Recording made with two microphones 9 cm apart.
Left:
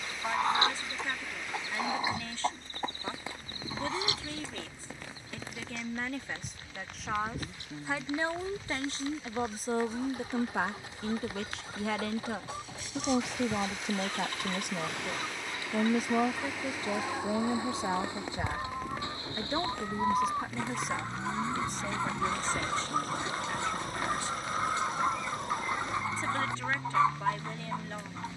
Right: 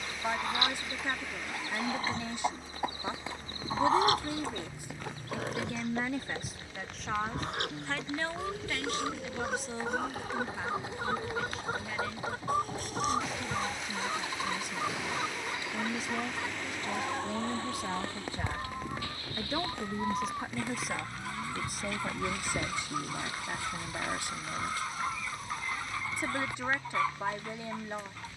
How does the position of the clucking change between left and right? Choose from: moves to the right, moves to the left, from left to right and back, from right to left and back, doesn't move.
from left to right and back.